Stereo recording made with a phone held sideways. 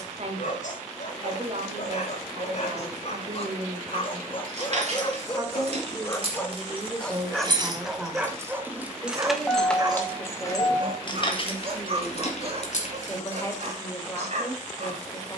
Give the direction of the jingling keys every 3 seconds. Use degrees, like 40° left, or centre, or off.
off, 50° right, 30° right, 20° left, 60° left.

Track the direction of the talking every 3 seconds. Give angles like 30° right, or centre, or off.
50° right, 40° right, 10° right, 20° left, 20° left.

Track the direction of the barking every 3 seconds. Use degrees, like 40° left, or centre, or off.
60° left, 40° left, centre, 40° right, 50° right.